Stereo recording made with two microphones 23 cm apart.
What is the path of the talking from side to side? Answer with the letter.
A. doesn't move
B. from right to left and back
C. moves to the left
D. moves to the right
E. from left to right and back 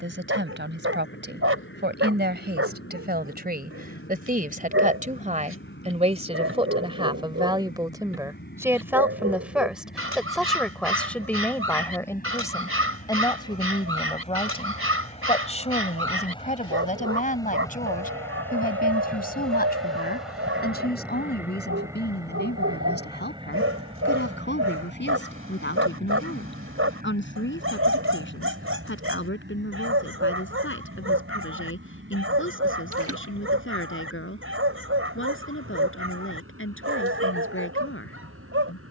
C.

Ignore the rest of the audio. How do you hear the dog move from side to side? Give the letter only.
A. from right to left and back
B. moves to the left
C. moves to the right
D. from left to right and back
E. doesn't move
E.